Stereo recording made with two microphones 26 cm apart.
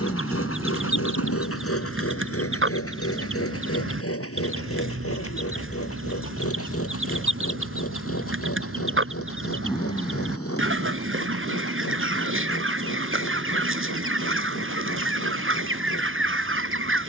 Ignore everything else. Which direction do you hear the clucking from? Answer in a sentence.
In this clip you hear the clucking on the right.